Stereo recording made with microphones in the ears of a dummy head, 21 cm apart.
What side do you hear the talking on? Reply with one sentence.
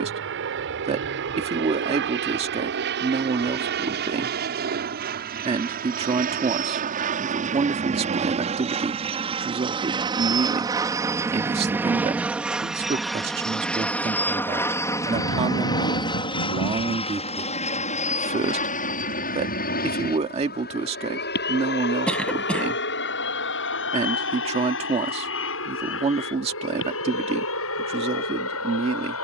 In this clip you hear the talking on the right.